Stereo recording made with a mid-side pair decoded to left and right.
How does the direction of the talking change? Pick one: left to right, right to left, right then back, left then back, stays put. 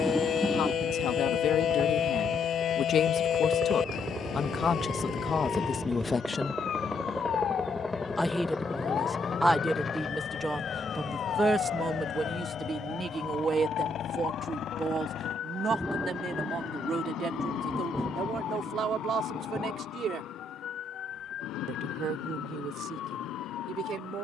left to right.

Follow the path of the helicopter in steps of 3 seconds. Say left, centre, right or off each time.
right, right, centre, left, left, left, left, left.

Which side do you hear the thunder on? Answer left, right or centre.
centre.